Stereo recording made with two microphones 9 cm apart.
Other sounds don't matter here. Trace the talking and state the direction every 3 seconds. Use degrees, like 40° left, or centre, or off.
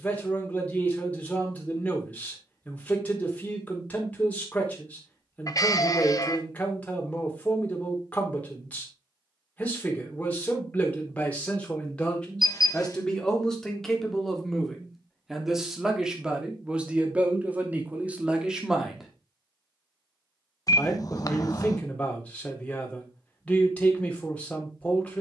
20° left, 20° left, 20° left, 20° left, 10° left, 10° right, centre, 10° left, 10° left.